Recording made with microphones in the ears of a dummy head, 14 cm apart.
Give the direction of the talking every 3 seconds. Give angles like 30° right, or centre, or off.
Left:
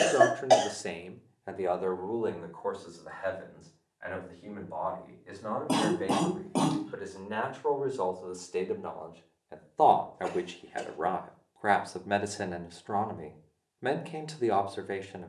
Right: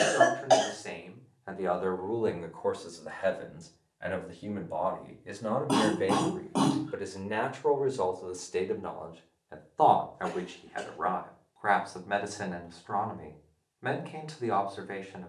20° left, 30° right, 10° right, 30° left, 30° left.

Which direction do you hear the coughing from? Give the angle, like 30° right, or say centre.
20° left.